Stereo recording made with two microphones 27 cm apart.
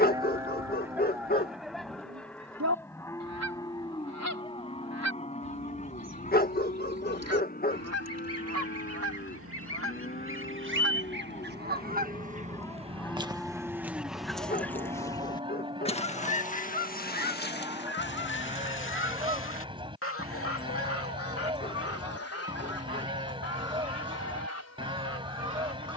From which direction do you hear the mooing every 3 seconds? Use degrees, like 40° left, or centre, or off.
centre, 20° left, 30° left, 30° left, centre, 20° right, 20° right, 20° right, 20° right.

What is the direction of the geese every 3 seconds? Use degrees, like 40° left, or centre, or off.
70° right, 70° right, 60° right, 50° right, 10° right, 30° left, 50° left, 60° left, 60° left.